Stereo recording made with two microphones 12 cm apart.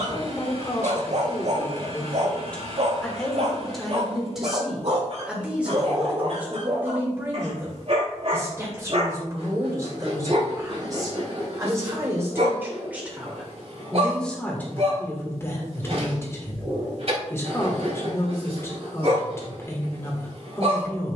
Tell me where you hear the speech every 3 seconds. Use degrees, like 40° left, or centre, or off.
20° left, centre, 20° right, 30° right, centre, 20° left, 20° left.